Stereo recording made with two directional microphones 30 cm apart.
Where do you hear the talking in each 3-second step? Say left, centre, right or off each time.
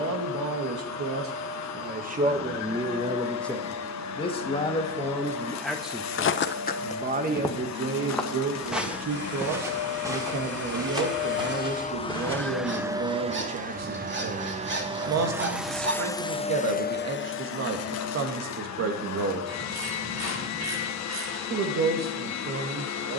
right, centre, right, right, right, right, right, right.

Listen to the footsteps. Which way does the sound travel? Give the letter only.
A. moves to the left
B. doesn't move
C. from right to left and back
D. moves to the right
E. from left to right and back
D.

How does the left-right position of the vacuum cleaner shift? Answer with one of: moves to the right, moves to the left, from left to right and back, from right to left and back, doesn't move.
from left to right and back.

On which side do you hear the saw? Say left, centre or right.
right.